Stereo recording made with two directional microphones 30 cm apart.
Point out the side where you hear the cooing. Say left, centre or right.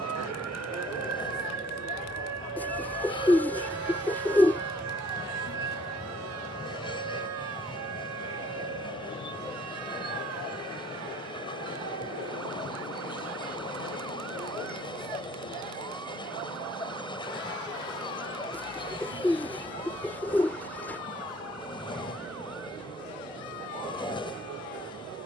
centre.